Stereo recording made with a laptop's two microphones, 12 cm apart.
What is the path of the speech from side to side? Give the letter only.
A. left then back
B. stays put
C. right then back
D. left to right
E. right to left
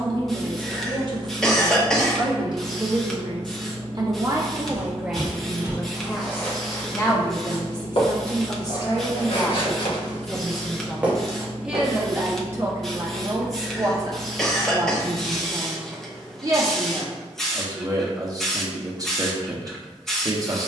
A.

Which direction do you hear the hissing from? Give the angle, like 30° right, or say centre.
centre.